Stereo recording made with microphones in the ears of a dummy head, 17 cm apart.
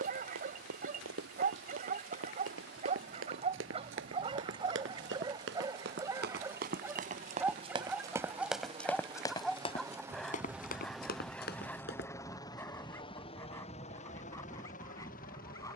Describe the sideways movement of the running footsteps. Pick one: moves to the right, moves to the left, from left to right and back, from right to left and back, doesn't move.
moves to the left.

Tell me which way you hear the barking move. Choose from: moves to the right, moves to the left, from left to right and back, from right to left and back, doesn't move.
moves to the left.